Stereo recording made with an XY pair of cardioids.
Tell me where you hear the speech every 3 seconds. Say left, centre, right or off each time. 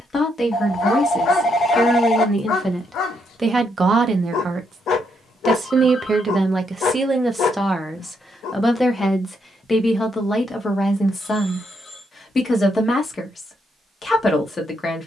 left, right, centre, left, left.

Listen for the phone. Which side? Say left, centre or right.
left.